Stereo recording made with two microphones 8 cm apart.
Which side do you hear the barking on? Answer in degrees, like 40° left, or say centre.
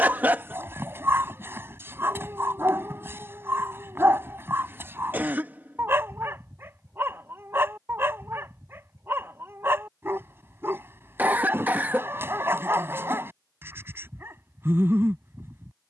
30° right.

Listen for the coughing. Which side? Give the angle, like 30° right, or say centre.
20° right.